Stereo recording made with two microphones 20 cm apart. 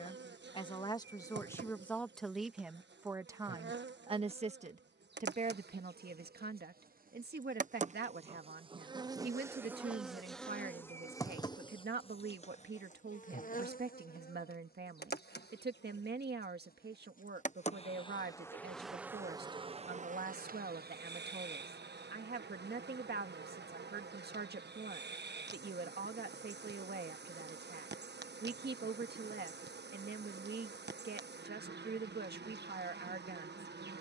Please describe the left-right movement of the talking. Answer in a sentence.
You can hear the talking move to the right.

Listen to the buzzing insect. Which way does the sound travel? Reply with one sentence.
You can hear the buzzing insect go left and come back.